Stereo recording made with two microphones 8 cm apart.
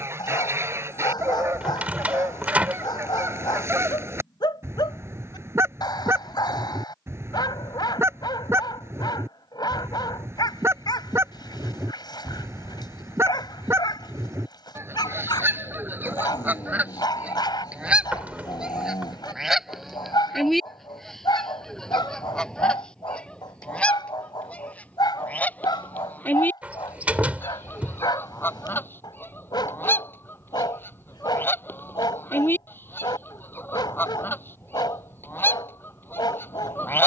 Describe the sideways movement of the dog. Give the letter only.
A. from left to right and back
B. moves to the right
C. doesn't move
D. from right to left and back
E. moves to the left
C.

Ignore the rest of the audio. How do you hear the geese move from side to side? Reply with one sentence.
You can hear the geese travel towards the left.